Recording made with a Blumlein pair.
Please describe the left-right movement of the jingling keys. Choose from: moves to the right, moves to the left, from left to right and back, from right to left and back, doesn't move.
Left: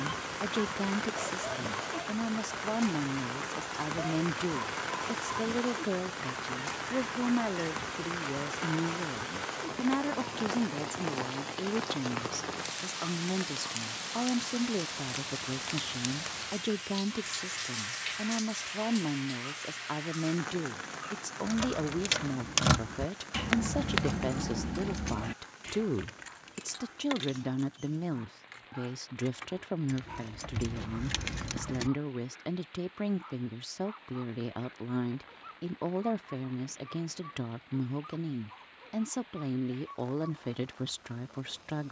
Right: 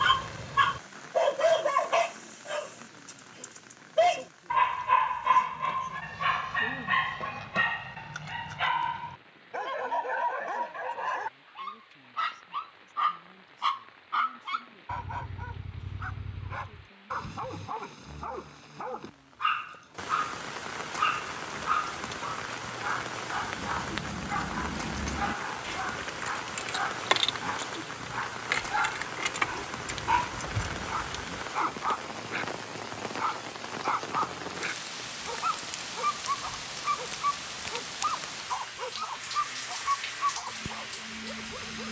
from left to right and back.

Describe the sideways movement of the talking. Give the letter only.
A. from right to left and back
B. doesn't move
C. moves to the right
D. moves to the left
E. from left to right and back
B.